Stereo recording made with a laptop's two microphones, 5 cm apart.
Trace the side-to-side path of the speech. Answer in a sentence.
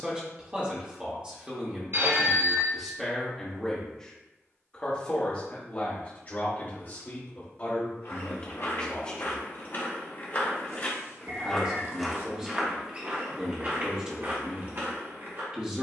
In this clip you hear the speech move from right to left and back again.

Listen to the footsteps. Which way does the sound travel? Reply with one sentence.
In this clip you hear the footsteps move to the right.